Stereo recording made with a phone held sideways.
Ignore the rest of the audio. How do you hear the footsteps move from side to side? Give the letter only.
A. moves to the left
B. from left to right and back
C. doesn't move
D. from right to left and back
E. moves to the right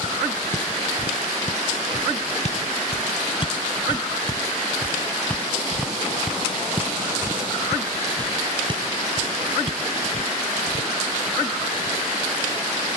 E.